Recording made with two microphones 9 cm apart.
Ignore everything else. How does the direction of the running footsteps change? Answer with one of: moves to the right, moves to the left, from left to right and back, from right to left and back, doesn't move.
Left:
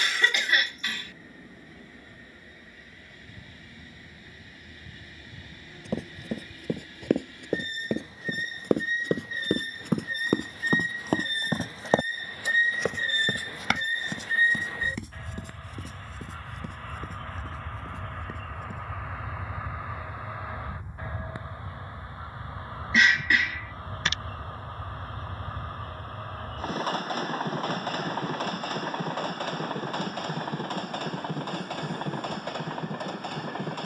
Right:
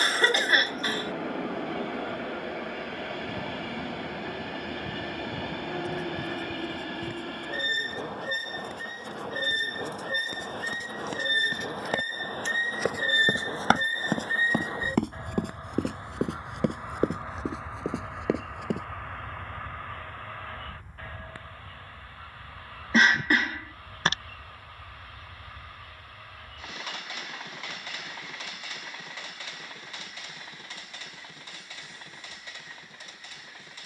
moves to the right.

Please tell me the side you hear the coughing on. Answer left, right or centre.
right.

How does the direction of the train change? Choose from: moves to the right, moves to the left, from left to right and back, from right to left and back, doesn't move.
moves to the left.